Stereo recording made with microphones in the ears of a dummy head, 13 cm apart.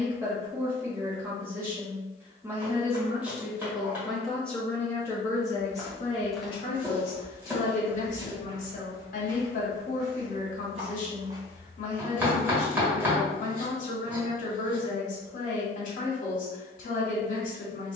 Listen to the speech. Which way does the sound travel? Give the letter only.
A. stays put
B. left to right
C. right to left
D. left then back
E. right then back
C.